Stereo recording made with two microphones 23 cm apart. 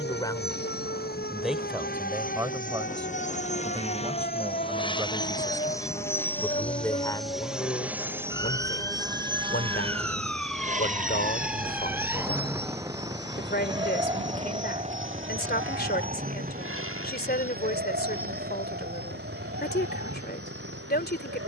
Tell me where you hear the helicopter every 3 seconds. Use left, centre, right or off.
left, left, centre, right, right, right, right.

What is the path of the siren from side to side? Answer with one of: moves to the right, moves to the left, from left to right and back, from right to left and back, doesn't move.
moves to the right.